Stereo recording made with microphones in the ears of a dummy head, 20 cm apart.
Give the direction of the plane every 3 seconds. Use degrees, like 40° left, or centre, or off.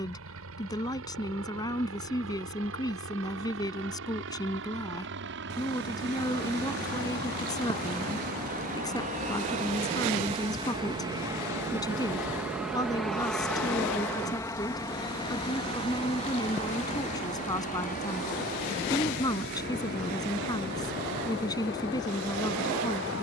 70° right, 60° right, 50° right, 20° right, centre, 30° left, 40° left, 50° left.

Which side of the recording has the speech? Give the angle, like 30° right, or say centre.
20° left.